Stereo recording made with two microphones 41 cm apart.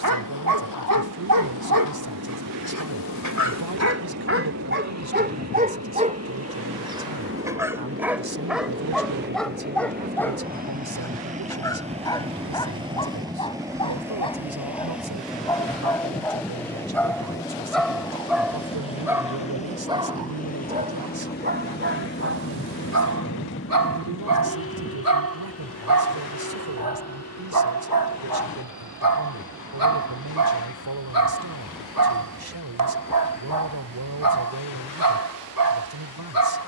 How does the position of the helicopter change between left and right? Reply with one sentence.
You can hear the helicopter go from the right side to the left.